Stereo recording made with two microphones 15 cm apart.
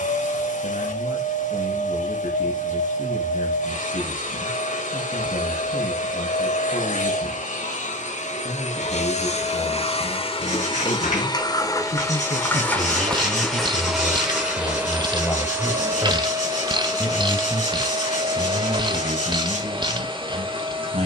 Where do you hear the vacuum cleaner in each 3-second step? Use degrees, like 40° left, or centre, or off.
60° left, 60° left, 60° left, 40° left, centre, 20° right, 30° right.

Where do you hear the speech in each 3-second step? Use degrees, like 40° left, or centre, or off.
60° left, 60° left, 60° left, 60° left, 50° left, centre, 50° right.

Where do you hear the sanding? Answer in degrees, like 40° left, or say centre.
60° left.